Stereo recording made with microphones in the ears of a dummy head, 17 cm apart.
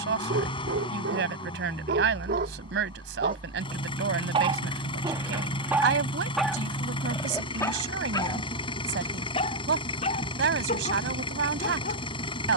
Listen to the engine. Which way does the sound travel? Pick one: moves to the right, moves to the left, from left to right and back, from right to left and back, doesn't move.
doesn't move.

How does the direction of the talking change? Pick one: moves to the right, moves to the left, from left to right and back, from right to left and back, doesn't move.
doesn't move.